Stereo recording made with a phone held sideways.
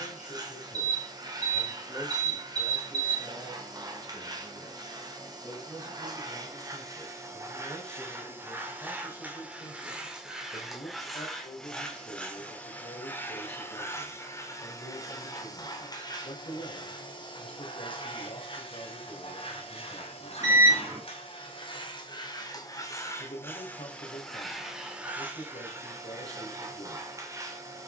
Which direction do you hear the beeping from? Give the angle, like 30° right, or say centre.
30° right.